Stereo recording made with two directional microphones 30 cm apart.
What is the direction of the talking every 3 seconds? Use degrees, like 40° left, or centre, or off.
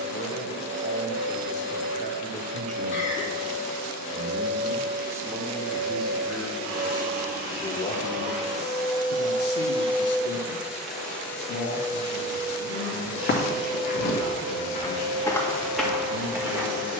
20° right, 10° right, 20° left, 60° left, 60° left, 60° left.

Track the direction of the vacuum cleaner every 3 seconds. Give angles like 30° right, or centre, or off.
60° right, 60° right, 40° right, 10° right, 50° right, 60° right.